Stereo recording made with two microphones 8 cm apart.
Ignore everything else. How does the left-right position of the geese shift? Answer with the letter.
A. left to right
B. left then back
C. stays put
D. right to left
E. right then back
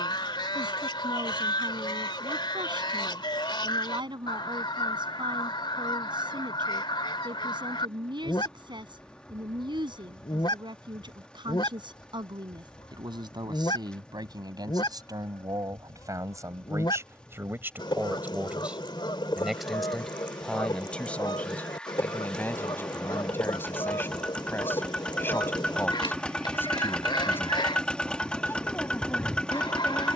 C.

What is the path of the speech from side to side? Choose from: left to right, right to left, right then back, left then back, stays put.
right to left.